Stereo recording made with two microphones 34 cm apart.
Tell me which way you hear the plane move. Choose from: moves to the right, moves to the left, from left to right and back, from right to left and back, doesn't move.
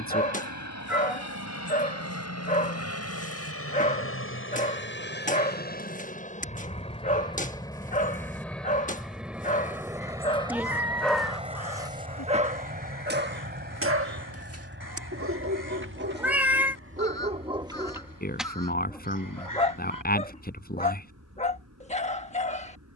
moves to the right.